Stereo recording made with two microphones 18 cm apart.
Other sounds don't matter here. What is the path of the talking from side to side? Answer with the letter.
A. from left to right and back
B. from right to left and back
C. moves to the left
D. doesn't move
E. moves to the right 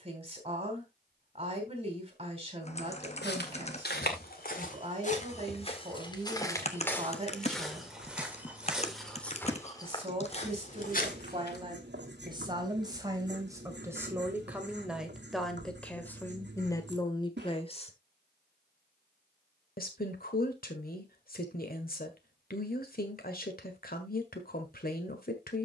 C.